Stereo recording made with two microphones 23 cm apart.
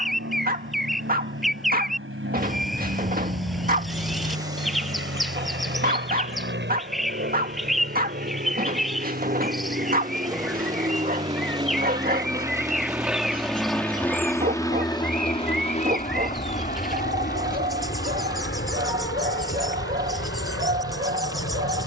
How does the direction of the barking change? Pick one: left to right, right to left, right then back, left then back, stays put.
stays put.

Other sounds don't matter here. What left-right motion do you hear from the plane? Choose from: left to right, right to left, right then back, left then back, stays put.
right to left.